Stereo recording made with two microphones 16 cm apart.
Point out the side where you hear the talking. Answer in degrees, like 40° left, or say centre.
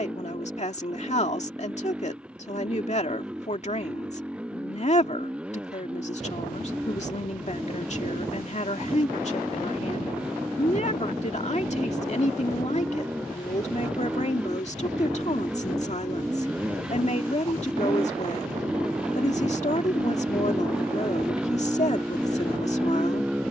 50° left.